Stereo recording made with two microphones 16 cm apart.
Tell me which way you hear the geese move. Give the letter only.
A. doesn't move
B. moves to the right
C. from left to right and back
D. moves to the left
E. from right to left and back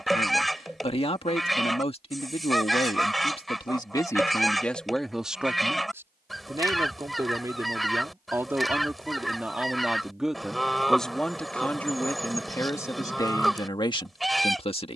A.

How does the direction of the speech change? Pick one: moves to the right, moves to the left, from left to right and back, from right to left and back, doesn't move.
from left to right and back.